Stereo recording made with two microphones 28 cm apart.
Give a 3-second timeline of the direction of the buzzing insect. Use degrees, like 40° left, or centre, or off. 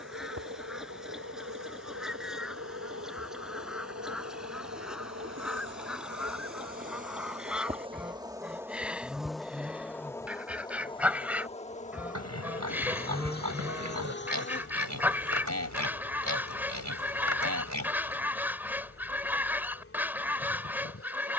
70° right, 50° right, 20° right, 10° left, 40° left, 50° left, 50° left.